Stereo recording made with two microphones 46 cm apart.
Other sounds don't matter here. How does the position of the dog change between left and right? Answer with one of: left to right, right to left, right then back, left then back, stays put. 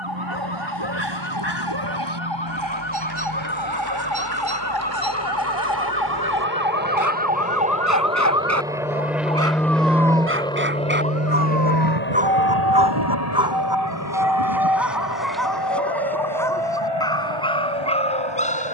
right to left.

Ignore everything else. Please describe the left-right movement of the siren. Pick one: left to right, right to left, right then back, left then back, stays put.
left to right.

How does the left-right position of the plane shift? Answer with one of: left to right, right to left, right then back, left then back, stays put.
right to left.